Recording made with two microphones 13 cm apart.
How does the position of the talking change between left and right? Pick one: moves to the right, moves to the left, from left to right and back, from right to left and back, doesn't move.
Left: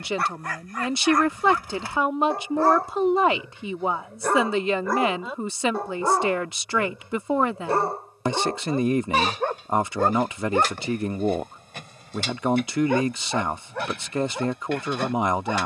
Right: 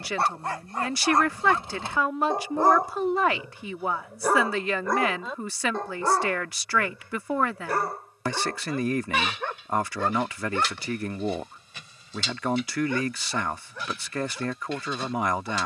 doesn't move.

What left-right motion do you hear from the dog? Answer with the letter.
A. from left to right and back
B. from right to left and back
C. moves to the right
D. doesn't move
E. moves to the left
E.